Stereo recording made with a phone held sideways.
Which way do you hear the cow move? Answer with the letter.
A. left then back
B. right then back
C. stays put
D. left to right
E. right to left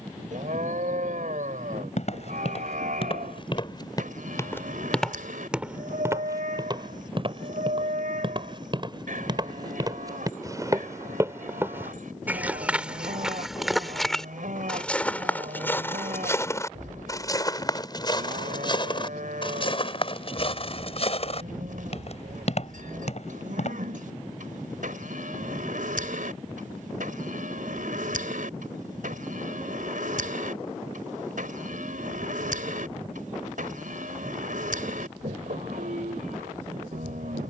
C.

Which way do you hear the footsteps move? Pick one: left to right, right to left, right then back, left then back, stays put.
right then back.